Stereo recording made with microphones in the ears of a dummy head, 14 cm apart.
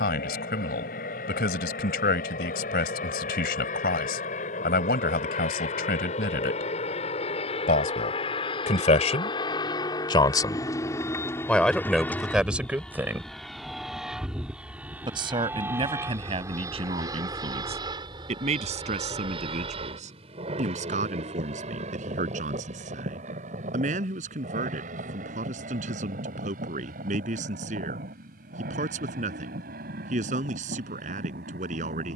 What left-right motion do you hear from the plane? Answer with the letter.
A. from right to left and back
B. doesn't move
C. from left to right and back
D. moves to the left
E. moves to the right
E.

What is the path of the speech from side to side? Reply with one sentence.
In this clip you hear the speech move to the right.